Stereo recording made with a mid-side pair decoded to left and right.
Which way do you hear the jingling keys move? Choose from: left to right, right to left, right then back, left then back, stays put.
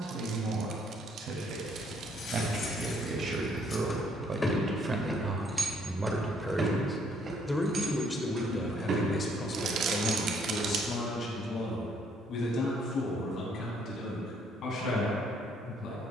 left to right.